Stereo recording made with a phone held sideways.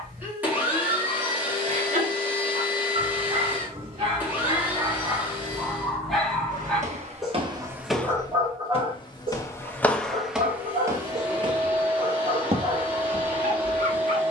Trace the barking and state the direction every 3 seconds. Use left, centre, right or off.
right, right, centre, right, right.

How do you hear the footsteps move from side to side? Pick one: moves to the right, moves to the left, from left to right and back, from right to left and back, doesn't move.
from right to left and back.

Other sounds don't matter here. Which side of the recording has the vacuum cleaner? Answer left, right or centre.
centre.